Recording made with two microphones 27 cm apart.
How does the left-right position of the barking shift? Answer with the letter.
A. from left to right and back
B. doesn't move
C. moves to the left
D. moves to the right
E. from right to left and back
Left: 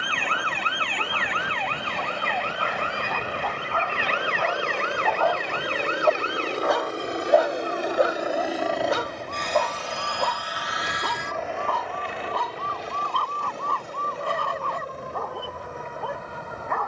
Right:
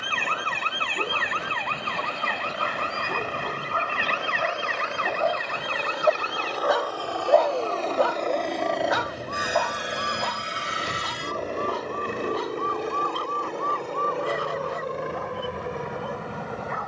C.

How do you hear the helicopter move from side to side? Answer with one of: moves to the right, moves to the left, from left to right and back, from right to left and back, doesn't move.
moves to the right.